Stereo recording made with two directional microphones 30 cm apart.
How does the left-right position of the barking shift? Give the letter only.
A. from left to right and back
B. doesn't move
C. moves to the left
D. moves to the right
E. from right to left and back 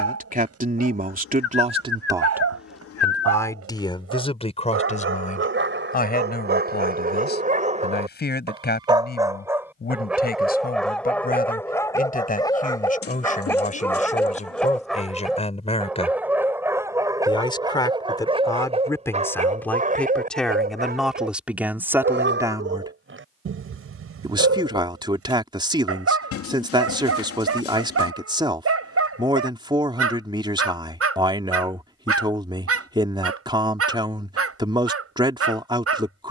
E.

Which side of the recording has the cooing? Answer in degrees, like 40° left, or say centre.
50° left.